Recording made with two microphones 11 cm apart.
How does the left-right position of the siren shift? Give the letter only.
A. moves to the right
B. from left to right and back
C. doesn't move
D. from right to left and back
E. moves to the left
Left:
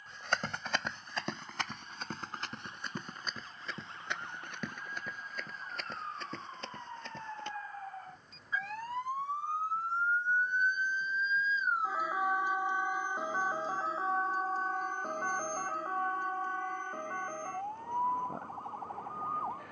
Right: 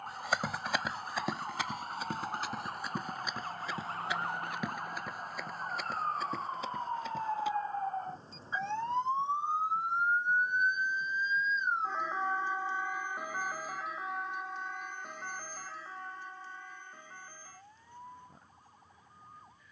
E.